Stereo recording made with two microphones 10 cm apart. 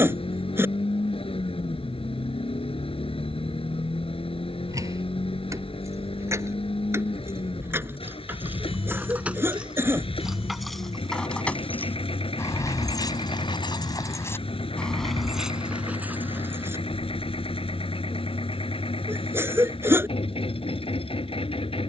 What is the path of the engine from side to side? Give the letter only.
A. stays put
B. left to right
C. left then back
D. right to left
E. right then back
A.